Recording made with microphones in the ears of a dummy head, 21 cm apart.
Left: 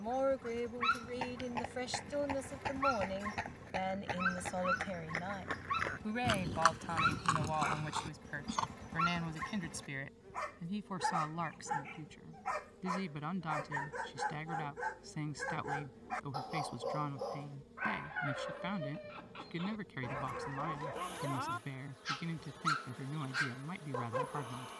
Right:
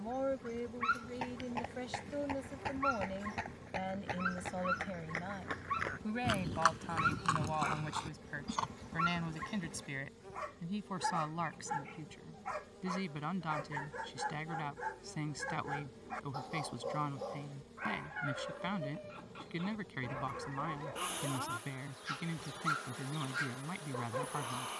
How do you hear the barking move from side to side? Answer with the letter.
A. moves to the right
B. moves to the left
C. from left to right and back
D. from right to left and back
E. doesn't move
E.